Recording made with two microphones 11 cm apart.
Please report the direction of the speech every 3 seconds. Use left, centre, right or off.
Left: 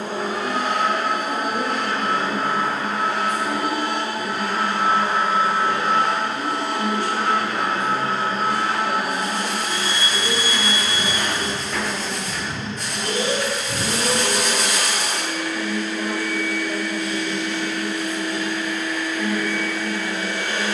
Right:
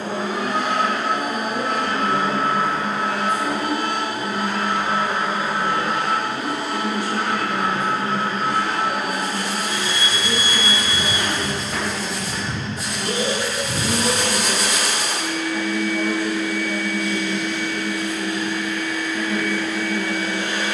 right, right, centre, centre, centre, right, right.